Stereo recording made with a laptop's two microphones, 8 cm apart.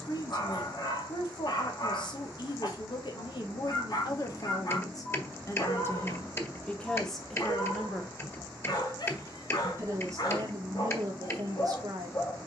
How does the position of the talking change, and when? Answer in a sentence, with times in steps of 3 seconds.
You can hear the talking on the left from 0 s, in the centre from 6 s and on the right from 9 s.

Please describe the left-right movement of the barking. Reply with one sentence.
In this clip you hear the barking stay put.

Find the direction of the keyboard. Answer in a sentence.
In this clip you hear the keyboard on the left.